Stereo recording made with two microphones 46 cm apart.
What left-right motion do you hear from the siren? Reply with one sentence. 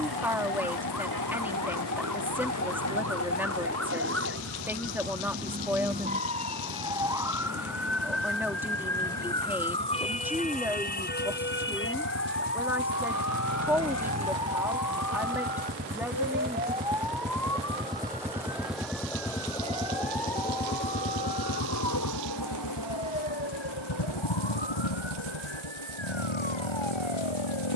You can hear the siren move from right to left.